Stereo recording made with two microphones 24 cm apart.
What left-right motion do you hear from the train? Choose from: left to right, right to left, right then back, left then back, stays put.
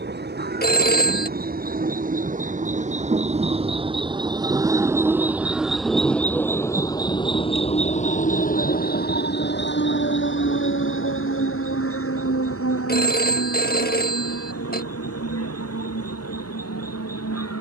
right to left.